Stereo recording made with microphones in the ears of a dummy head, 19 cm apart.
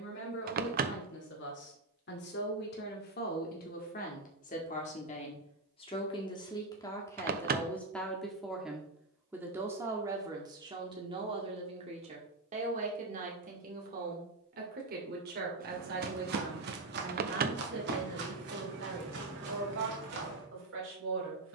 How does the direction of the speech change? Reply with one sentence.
You can hear the speech move from left to right.